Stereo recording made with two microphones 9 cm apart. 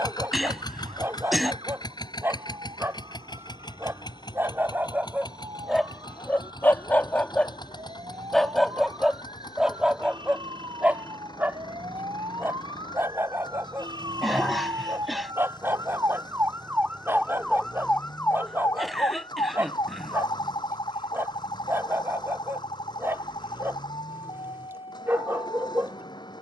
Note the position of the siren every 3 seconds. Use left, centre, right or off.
right, right, right, right, right, right, left, left, left.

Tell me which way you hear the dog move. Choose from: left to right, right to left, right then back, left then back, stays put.
left then back.